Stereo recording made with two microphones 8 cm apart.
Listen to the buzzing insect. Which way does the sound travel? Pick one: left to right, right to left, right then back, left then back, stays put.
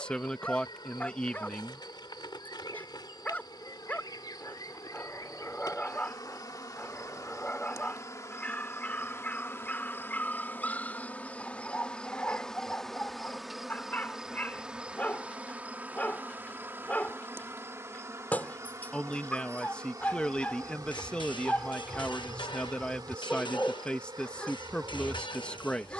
left to right.